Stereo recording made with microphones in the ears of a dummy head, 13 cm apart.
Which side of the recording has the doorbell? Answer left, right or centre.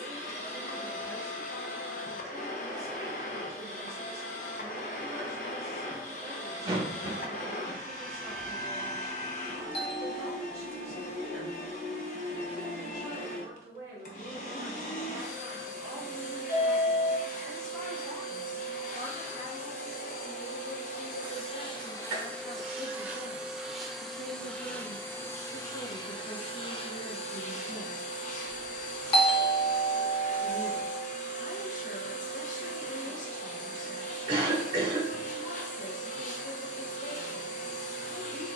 left.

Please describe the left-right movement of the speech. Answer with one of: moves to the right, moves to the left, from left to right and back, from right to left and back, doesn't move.
moves to the left.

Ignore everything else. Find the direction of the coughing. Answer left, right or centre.
right.